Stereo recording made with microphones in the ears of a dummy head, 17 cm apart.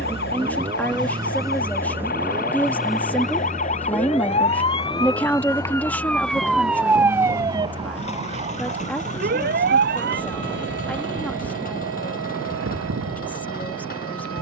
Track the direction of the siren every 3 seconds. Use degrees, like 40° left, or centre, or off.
50° left, 30° left, 20° right, 60° right, 70° right.